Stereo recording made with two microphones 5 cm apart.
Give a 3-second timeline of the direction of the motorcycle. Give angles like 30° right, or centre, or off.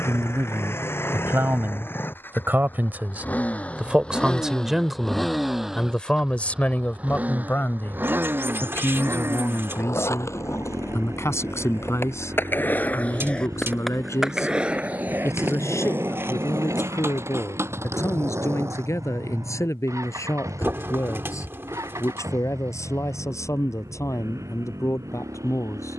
50° left, 10° left, 30° right, 60° right, 70° right, 70° right, 80° right, 80° right, 80° right.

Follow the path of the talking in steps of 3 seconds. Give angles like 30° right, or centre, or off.
50° right, 10° right, 40° left, 60° left, 70° left, 80° left, 80° left, 80° left, 80° left.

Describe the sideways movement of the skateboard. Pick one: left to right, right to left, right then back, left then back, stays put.
left to right.